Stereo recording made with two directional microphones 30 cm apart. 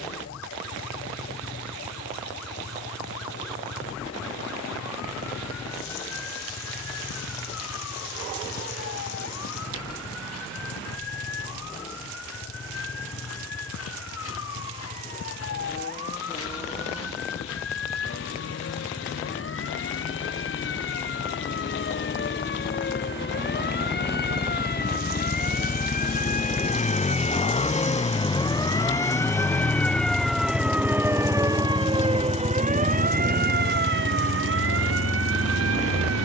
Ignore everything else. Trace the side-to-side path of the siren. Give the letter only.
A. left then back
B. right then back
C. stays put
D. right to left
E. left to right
E.